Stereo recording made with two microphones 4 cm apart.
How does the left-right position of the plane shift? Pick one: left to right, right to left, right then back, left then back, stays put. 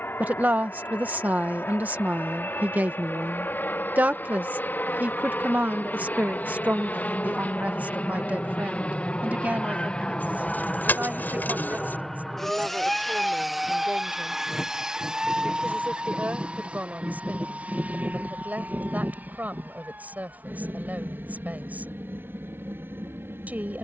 left to right.